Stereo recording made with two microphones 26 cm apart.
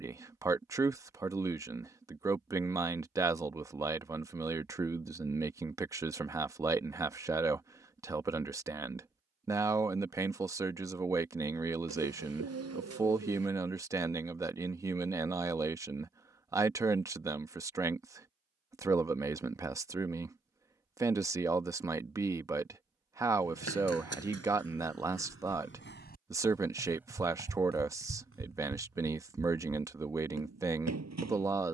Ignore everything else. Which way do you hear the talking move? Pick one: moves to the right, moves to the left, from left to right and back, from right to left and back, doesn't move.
doesn't move.